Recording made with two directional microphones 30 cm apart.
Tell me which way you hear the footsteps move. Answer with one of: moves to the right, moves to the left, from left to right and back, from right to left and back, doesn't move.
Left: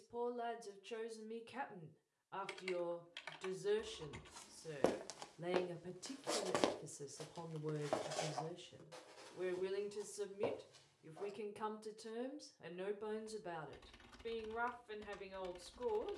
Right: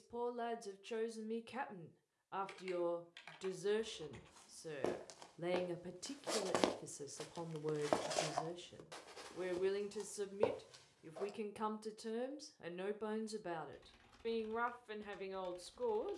moves to the right.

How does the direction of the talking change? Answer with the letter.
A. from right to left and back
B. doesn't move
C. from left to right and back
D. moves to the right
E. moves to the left
B.